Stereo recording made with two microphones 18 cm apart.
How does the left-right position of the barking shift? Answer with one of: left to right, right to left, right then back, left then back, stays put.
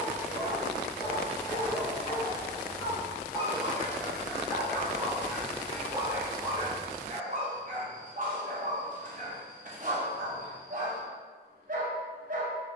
left to right.